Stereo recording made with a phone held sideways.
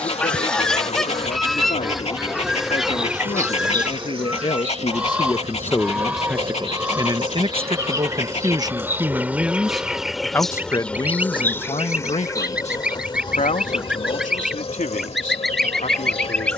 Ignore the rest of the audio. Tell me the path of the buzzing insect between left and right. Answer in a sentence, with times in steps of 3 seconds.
In this clip you hear the buzzing insect on the left from 0 s, on the right from 3 s, in the centre from 9 s and on the left from 12 s.